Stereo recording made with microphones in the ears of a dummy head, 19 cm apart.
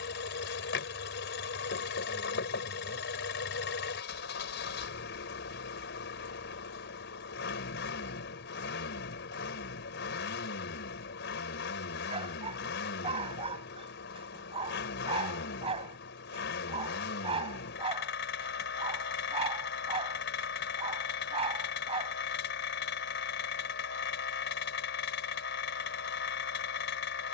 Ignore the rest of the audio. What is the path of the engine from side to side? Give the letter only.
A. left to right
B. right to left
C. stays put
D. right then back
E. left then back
C.